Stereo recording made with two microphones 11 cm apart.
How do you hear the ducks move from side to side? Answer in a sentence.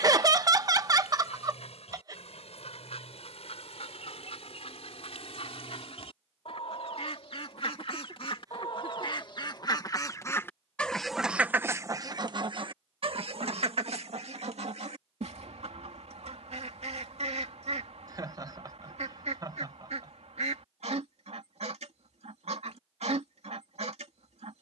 In this clip you hear the ducks move from left to right.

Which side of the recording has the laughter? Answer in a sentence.
In this clip you hear the laughter on the right.